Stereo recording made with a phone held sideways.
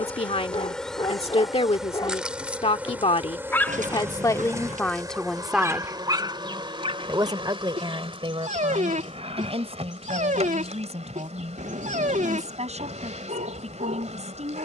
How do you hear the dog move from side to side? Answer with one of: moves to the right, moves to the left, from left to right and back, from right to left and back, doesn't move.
moves to the right.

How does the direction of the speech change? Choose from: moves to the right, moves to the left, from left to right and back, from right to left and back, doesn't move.
moves to the right.